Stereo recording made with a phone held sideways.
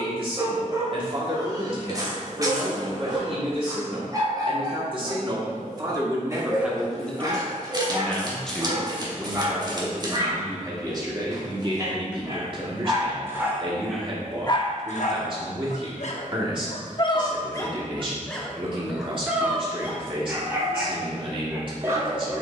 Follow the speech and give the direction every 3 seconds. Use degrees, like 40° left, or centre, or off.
40° right, 40° right, centre, 20° right, 40° right, 40° right, 40° right, 40° right.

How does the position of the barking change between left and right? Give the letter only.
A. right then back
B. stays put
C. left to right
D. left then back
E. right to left
D.